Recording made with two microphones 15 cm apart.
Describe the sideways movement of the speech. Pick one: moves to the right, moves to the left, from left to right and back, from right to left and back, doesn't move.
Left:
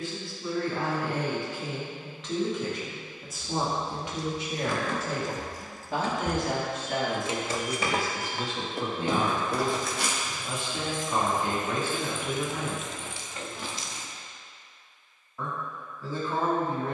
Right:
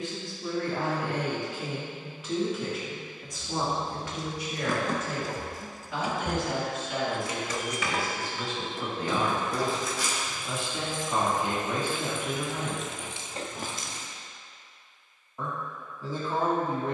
from right to left and back.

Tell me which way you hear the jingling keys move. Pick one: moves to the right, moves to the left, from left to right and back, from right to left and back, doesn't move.
from right to left and back.